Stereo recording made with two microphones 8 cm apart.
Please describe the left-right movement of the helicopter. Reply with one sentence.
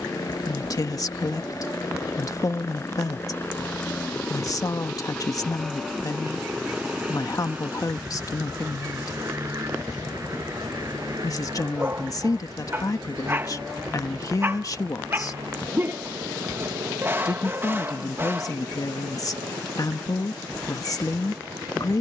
You can hear the helicopter travel towards the right.